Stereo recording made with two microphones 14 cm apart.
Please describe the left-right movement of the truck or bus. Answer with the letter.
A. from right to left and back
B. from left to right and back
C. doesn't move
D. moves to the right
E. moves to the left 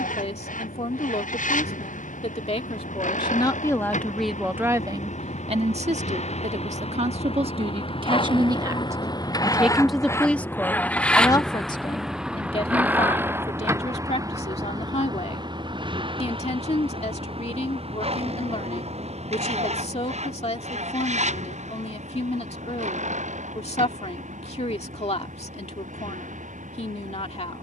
D.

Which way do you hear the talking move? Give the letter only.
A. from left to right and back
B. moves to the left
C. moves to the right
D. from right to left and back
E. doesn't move
A.